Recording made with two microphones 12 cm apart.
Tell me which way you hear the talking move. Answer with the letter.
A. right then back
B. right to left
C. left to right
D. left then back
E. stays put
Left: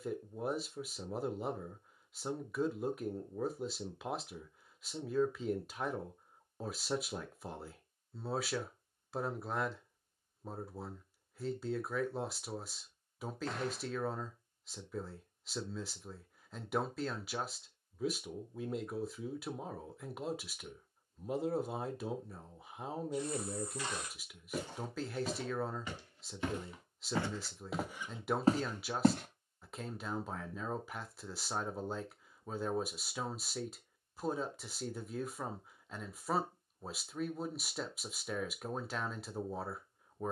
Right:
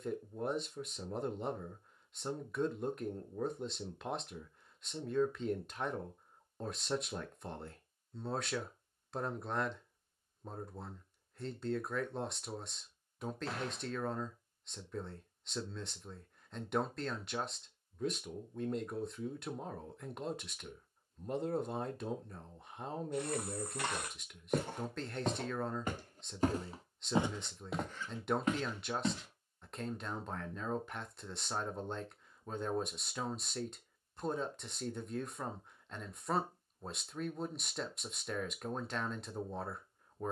E.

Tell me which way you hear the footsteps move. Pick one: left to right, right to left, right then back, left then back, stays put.
right to left.